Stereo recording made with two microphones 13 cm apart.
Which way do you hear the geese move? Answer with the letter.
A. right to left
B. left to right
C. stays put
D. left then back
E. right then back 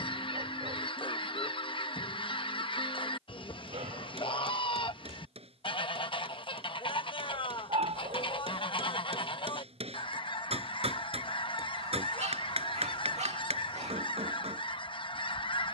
C.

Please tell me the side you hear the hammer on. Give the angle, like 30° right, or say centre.
60° right.